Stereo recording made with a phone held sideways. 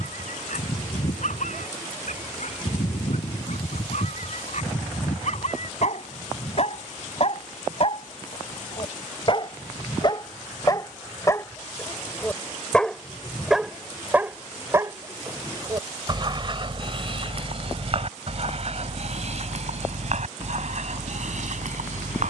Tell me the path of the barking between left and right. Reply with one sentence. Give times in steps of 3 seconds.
In this clip you hear the barking on the left from 0 s, in the centre from 12 s and on the right from 15 s.